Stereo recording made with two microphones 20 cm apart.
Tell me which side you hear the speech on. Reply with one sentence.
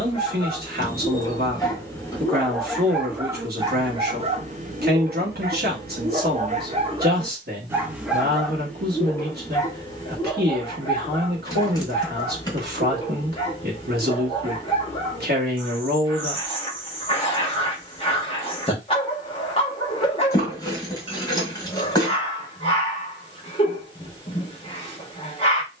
You can hear the speech on the right.